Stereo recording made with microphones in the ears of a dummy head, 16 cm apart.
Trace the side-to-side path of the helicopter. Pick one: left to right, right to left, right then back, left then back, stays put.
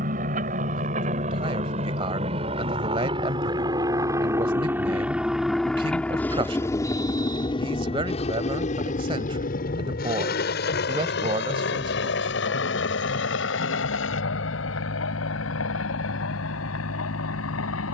right to left.